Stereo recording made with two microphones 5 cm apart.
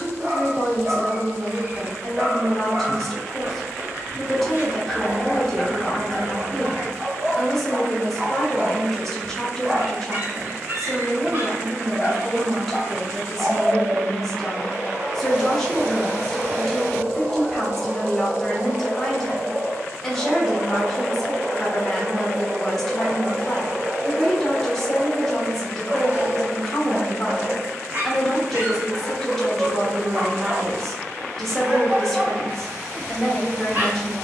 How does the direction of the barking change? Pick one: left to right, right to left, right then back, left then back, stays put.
stays put.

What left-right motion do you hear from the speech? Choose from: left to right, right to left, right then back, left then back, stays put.
stays put.